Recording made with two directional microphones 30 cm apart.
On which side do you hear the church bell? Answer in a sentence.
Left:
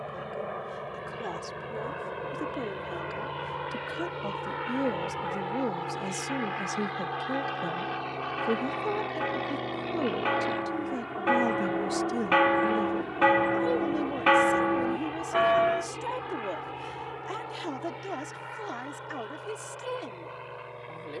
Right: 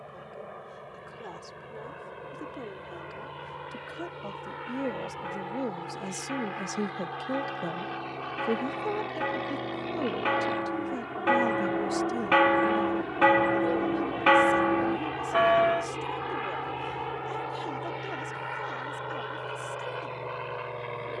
You can hear the church bell in the centre.